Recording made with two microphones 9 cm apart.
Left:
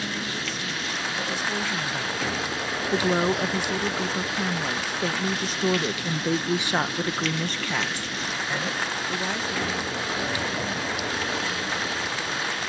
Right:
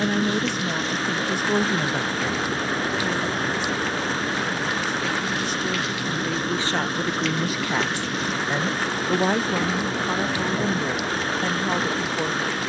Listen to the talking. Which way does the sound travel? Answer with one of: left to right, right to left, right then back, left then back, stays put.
left then back.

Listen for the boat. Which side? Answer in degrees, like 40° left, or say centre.
40° right.